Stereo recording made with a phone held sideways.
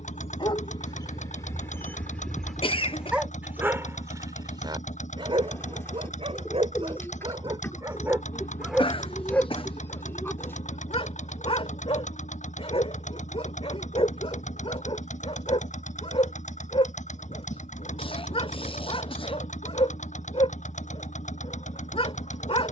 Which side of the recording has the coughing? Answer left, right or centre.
left.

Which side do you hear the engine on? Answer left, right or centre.
left.